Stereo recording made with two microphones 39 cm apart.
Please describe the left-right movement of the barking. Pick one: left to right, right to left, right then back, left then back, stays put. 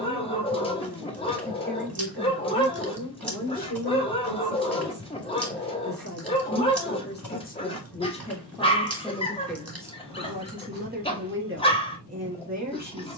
stays put.